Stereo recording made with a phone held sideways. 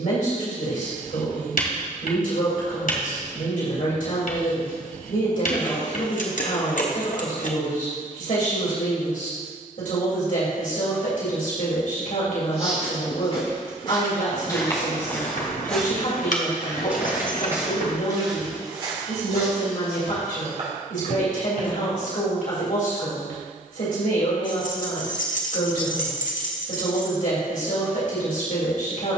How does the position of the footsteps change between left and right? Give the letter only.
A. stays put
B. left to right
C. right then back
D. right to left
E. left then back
B.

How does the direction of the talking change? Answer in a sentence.
In this clip you hear the talking stay in one place.